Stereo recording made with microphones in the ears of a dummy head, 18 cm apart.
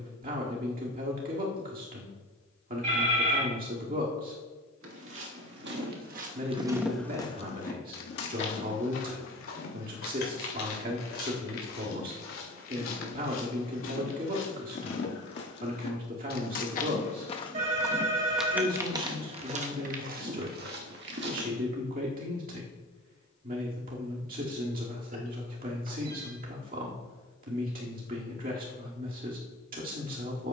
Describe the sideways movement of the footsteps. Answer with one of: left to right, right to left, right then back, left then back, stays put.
left then back.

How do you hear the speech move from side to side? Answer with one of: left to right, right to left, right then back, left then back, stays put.
stays put.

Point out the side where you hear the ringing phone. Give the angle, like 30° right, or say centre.
40° right.